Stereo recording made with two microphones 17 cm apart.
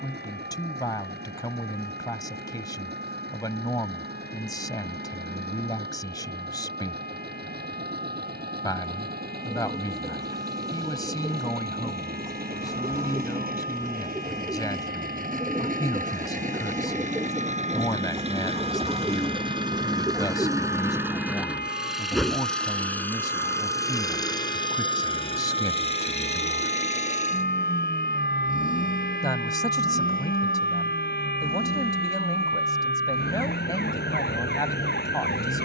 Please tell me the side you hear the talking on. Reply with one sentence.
You can hear the talking on the left.